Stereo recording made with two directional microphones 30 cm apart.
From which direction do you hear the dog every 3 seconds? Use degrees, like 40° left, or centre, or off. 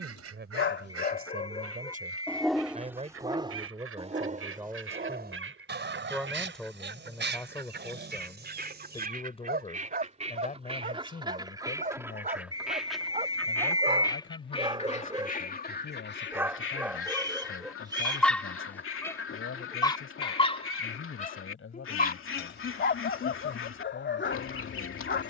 20° left, 20° right, 30° right, 30° right, 20° right, 10° right, 10° left, 30° left, 40° left.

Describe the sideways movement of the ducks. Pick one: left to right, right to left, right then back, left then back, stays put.
right to left.